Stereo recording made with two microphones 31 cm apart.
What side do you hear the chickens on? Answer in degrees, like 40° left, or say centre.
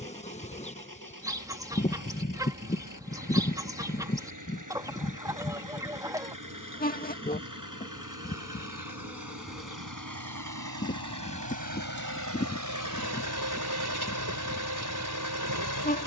10° right.